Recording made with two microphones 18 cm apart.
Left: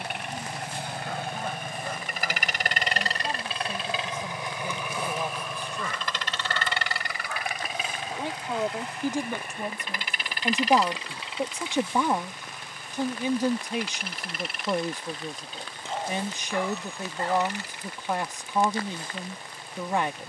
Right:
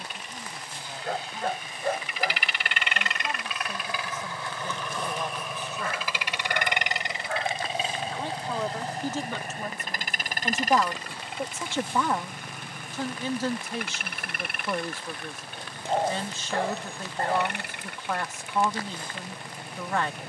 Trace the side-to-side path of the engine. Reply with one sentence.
You can hear the engine travel towards the right.